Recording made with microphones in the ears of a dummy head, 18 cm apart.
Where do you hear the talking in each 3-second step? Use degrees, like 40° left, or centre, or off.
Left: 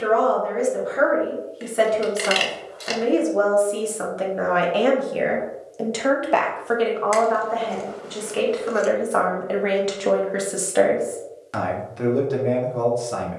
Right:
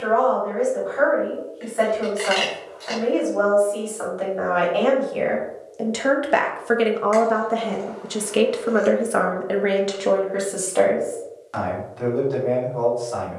40° left, 30° left, 40° right, centre, 40° left.